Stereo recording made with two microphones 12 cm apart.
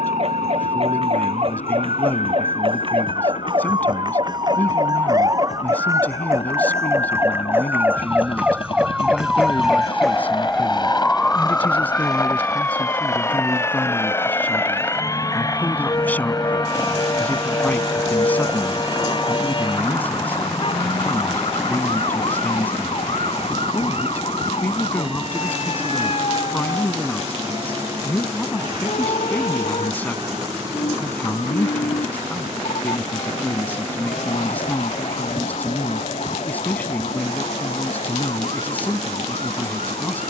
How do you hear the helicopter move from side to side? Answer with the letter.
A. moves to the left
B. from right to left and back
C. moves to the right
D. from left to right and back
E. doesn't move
C.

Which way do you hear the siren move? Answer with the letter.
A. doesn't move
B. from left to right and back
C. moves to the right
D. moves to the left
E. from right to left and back
D.